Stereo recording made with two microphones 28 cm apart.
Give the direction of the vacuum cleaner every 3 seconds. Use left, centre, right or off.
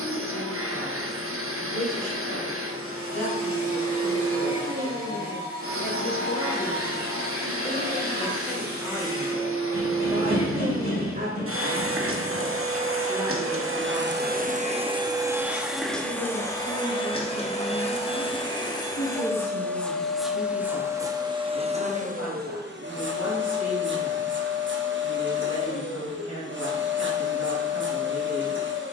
right, right, right, right, right, centre, centre, right, right, right.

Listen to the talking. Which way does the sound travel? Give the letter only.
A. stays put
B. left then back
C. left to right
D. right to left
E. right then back
E.